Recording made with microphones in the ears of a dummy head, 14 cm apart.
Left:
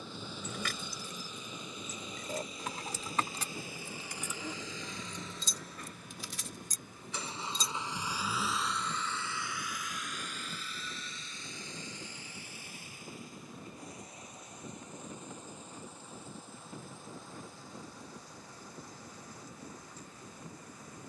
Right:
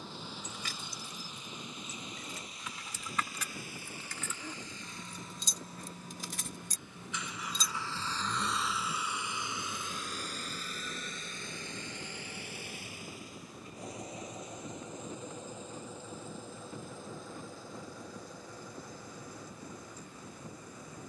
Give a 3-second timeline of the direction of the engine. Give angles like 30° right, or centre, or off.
80° left, 60° left, 20° left, 30° right, 60° right, 60° right, 70° right.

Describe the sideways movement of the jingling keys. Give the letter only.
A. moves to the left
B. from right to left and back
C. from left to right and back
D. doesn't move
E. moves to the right
E.